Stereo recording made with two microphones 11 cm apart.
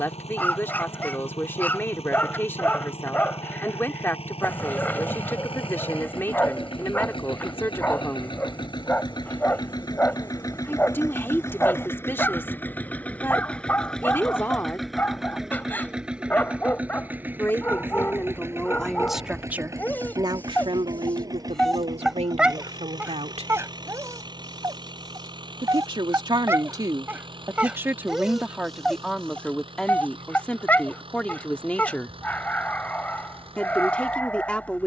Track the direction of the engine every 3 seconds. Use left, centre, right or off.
left, left, left, left, centre, centre, right, right, right, right, right, right.